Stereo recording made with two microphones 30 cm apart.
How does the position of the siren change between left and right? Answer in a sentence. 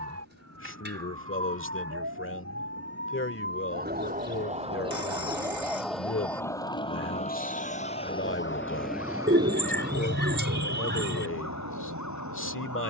You can hear the siren move to the left.